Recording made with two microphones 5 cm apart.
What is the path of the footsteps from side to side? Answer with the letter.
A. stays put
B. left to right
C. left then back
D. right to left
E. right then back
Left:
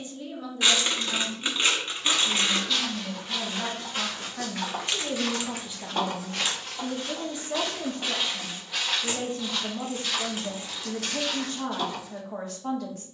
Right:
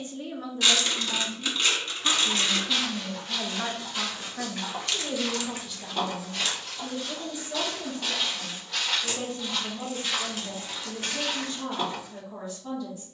C.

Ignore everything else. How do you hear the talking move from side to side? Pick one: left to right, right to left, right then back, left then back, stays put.
right to left.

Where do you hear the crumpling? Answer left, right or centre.
left.